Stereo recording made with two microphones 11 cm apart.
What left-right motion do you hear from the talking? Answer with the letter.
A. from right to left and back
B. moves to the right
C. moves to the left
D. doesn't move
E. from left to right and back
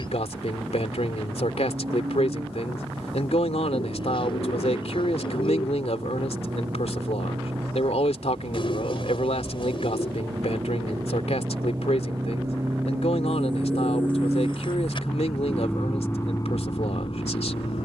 D.